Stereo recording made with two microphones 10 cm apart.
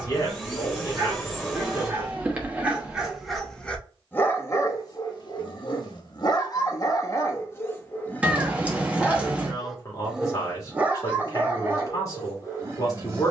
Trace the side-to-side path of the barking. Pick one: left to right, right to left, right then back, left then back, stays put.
left then back.